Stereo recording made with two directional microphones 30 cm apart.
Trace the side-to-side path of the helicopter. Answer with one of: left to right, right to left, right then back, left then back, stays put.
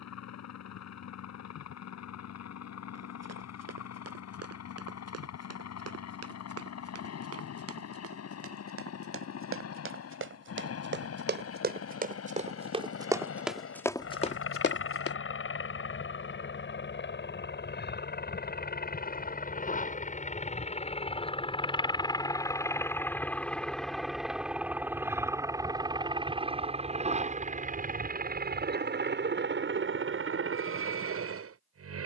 left to right.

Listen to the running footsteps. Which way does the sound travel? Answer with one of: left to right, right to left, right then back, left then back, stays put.
right to left.